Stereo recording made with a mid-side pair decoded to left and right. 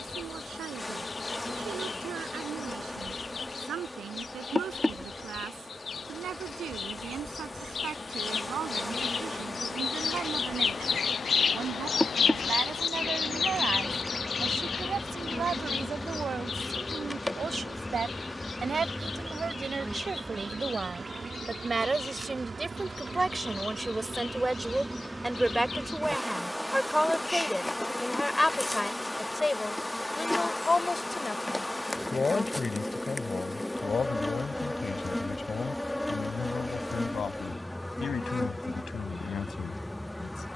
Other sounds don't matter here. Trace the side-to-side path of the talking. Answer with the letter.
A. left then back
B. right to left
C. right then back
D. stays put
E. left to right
B.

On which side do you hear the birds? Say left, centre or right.
left.